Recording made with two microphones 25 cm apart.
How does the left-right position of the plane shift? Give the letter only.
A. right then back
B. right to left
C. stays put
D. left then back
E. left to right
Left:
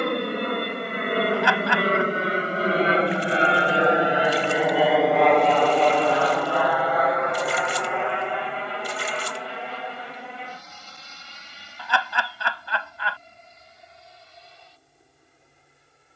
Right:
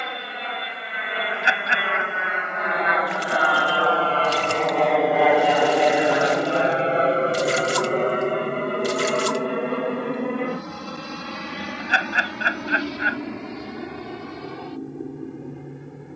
E.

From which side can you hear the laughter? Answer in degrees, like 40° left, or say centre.
20° right.